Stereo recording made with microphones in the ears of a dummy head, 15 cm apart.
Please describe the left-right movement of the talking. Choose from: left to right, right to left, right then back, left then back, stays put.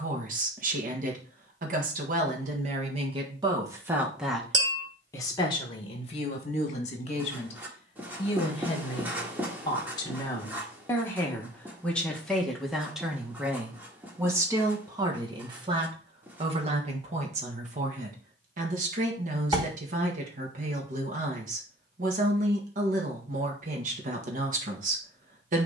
left then back.